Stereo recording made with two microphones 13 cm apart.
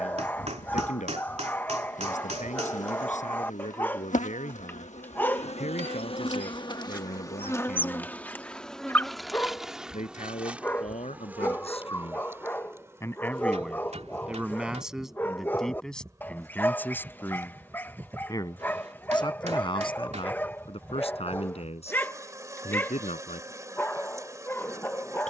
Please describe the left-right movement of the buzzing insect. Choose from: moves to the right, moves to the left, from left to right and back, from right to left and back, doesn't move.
moves to the right.